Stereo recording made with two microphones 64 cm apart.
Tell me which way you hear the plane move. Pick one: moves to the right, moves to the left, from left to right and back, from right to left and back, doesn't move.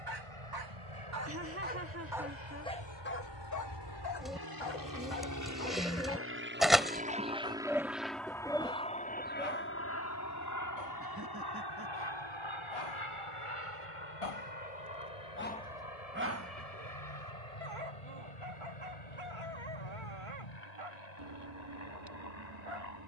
moves to the left.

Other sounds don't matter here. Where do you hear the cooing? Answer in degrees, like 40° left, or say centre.
centre.